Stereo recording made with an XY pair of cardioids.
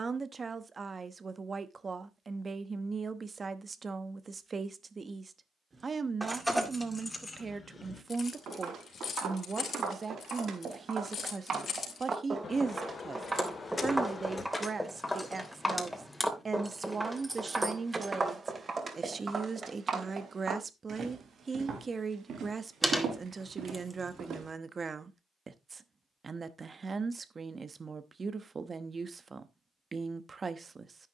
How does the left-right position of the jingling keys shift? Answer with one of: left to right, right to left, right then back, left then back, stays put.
left then back.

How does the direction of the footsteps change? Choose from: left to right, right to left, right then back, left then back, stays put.
left then back.